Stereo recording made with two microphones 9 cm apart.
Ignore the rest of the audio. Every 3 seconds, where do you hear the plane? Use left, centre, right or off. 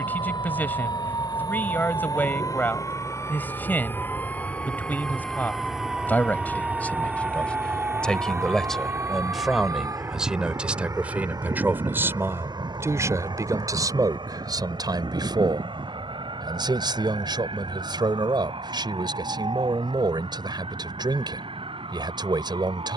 left, left, centre, right, right, right, right, right.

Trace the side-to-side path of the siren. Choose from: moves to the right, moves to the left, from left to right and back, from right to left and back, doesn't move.
moves to the right.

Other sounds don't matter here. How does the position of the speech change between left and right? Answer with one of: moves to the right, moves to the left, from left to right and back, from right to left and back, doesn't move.
moves to the right.